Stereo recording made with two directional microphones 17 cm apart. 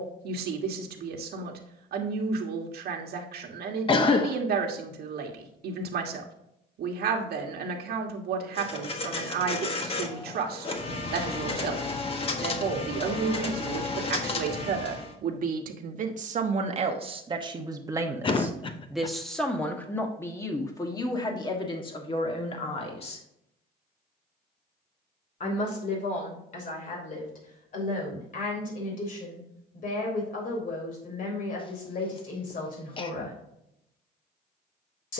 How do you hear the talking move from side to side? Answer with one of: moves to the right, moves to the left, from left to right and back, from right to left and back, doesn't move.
moves to the left.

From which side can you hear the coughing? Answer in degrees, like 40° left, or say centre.
30° left.